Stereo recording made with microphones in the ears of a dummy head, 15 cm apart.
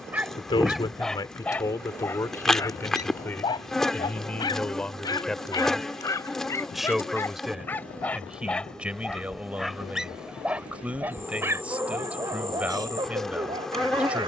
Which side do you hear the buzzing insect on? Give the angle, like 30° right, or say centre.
centre.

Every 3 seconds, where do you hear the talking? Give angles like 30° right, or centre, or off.
20° left, 10° left, centre, 10° right, 10° right.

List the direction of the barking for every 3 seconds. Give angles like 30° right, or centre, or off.
10° left, 20° left, 10° left, 10° right, 30° right.